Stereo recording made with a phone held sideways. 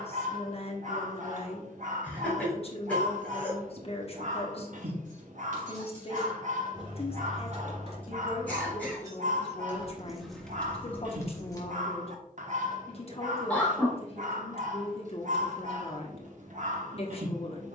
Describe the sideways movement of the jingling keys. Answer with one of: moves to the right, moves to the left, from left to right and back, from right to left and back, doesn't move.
moves to the left.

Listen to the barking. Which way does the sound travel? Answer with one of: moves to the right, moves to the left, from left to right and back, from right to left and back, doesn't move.
doesn't move.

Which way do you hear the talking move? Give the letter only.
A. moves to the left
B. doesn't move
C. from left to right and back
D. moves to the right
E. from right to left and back
B.